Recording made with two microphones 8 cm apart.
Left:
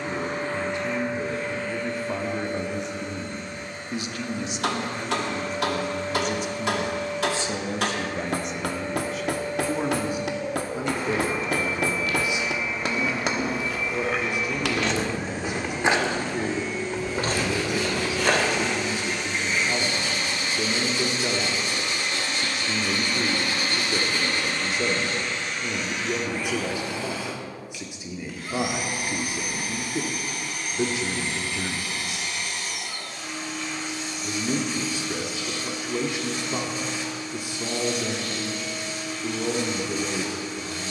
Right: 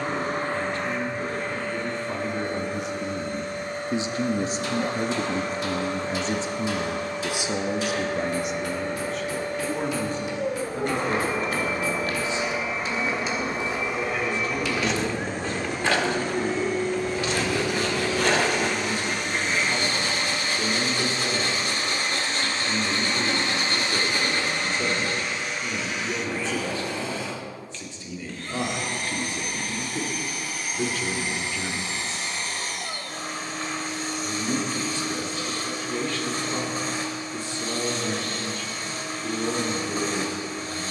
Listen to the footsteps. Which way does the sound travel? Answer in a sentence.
In this clip you hear the footsteps go from the right side to the left.